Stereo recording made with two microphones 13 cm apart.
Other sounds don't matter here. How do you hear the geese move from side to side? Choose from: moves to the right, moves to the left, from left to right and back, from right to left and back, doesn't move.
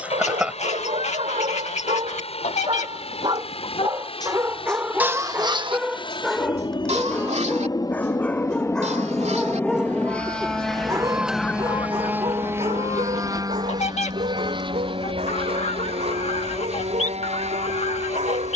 from left to right and back.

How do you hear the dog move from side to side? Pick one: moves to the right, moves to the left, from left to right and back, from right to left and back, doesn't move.
from right to left and back.